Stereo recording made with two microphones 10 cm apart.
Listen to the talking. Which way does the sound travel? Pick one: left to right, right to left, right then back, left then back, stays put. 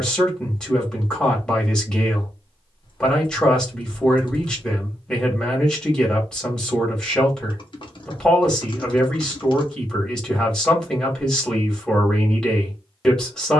stays put.